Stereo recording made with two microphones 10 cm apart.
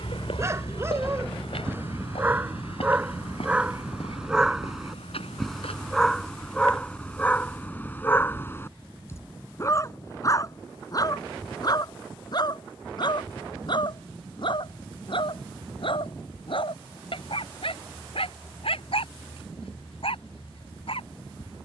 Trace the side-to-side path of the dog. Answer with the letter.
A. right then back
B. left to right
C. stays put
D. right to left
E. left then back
D.